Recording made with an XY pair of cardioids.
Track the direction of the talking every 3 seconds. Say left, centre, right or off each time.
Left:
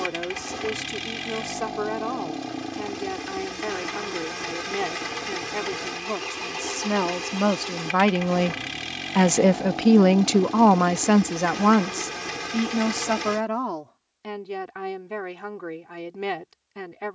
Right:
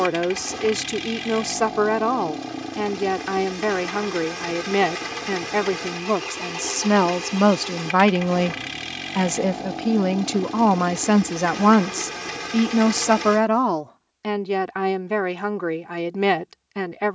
right, right, right, centre, right, right.